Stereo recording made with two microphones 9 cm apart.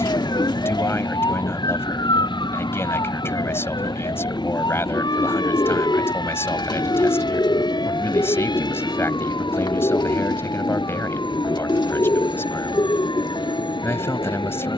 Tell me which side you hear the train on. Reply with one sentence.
You can hear the train on the left.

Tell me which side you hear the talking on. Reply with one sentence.
In this clip you hear the talking on the left.